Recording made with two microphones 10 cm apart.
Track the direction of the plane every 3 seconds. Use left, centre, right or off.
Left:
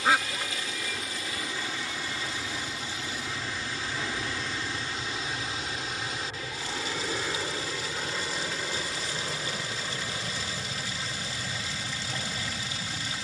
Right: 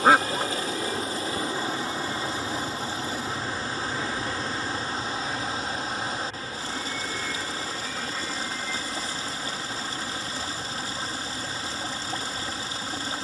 right, centre, left, left, left.